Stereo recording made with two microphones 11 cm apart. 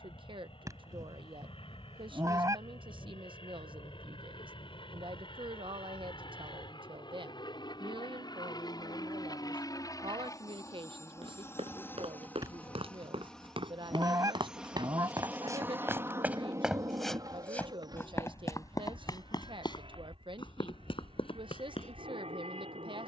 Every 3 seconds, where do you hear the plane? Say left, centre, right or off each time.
left, left, left, left, centre, right, right, right.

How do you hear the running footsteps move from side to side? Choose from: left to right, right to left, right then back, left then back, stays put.
right to left.